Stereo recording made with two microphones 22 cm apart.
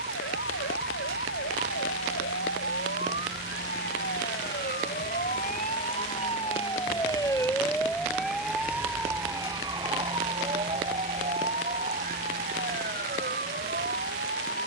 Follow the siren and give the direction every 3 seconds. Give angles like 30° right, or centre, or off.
70° left, 50° left, 10° left, 30° right, 50° right.